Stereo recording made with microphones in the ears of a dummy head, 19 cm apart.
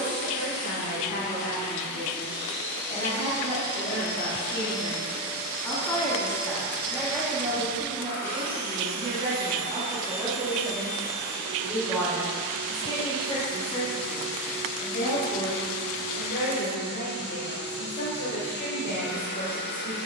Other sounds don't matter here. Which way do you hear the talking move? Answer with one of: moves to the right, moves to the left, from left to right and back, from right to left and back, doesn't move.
from left to right and back.